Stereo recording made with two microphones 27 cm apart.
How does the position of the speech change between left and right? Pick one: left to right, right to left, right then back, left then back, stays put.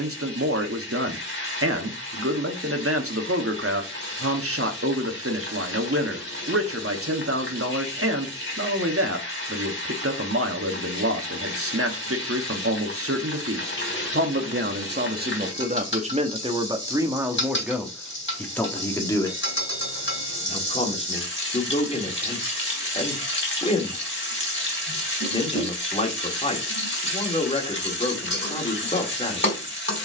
right to left.